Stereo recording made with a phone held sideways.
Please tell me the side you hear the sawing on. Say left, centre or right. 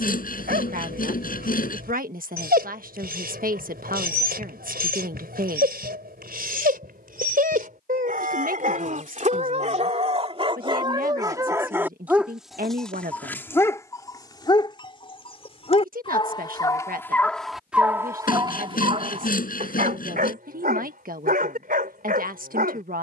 left.